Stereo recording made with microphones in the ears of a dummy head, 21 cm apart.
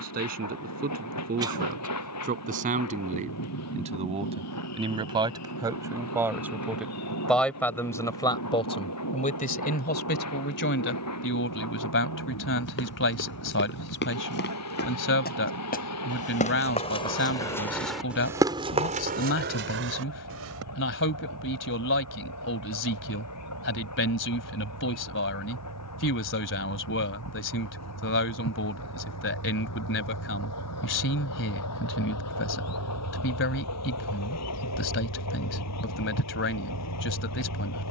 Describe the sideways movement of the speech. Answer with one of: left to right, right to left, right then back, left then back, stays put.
right to left.